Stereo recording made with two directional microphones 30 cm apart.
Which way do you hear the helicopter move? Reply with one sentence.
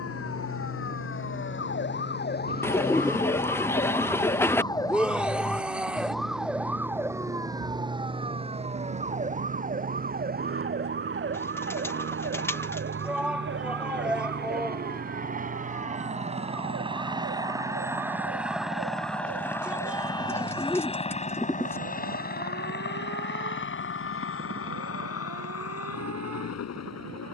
In this clip you hear the helicopter move from right to left.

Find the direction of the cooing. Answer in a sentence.
In this clip you hear the cooing in the centre.